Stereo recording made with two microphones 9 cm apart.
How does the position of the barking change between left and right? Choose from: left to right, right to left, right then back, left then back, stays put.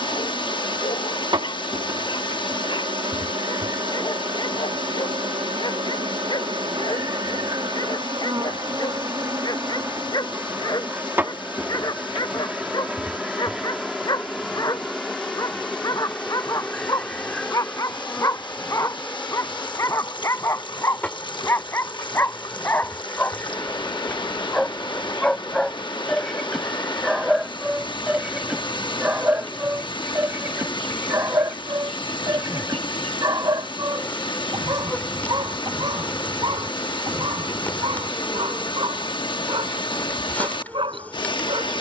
left to right.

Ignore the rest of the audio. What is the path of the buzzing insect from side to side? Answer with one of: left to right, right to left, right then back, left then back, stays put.
right to left.